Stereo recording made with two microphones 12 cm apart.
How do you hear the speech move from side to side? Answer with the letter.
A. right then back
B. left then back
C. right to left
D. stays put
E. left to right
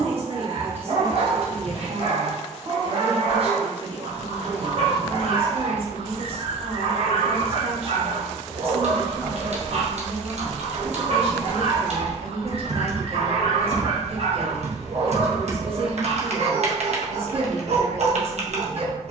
D.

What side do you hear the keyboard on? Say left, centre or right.
right.